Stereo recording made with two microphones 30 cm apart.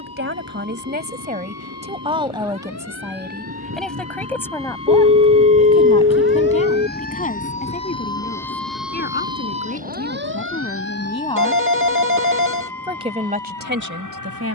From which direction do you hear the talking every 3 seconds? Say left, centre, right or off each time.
right, centre, left, left, right.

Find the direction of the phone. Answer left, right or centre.
right.